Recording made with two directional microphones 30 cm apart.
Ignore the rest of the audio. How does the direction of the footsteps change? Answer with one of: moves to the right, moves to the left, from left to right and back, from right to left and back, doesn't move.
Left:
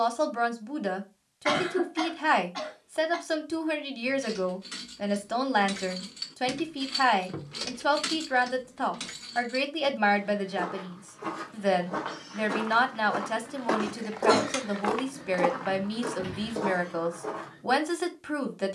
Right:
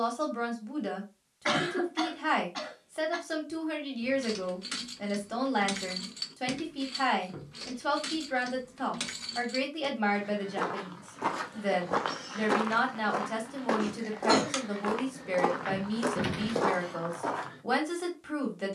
from right to left and back.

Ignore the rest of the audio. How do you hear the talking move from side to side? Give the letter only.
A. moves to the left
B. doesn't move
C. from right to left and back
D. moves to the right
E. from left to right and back
B.